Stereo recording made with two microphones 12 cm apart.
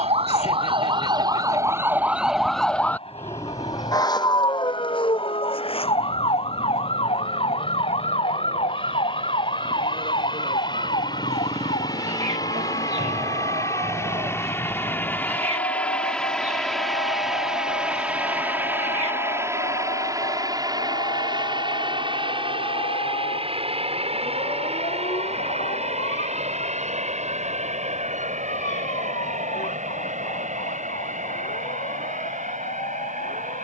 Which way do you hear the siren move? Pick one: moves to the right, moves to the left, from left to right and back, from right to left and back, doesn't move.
moves to the left.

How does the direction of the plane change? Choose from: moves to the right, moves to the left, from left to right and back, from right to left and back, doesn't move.
moves to the right.